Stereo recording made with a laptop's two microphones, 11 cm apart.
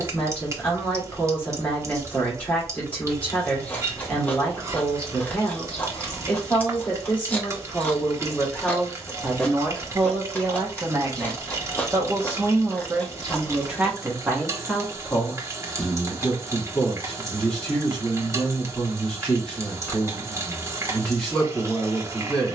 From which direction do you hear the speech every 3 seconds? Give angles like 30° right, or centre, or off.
10° left, 10° left, 10° left, 20° right, 10° right, 10° left, 10° left, 10° left.